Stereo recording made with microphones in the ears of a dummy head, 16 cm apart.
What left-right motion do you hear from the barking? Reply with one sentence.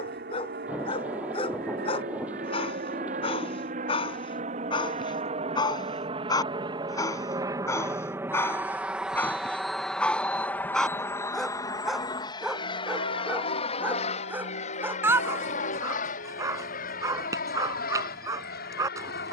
You can hear the barking move to the right.